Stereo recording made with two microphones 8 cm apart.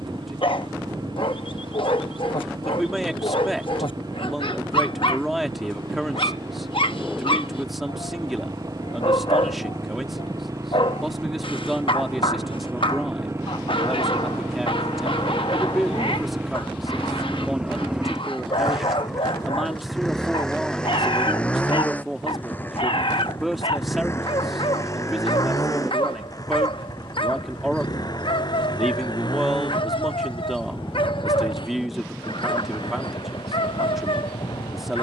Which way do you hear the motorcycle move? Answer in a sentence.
You can hear the motorcycle move to the left.